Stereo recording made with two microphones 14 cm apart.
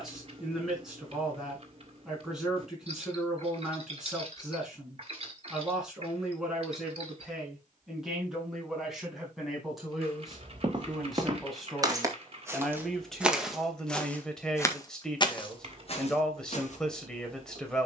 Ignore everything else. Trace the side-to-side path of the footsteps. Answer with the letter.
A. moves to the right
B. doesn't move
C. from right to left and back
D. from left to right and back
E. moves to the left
E.